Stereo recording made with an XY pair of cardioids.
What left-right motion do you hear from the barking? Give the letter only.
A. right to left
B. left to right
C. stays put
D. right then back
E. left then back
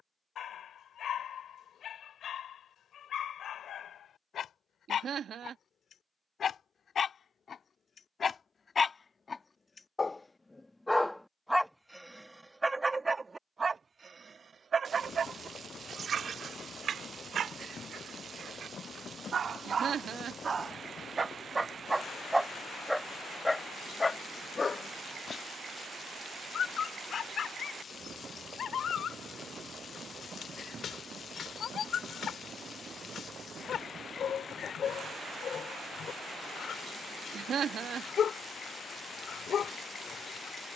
D.